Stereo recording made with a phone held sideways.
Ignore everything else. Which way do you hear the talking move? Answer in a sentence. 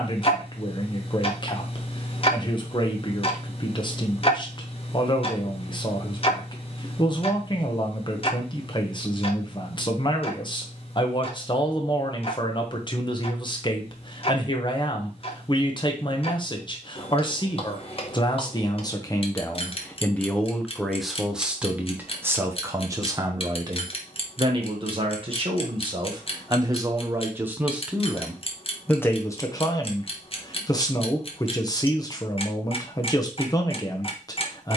In this clip you hear the talking move from left to right and back again.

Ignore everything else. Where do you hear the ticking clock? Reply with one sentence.
You can hear the ticking clock on the left.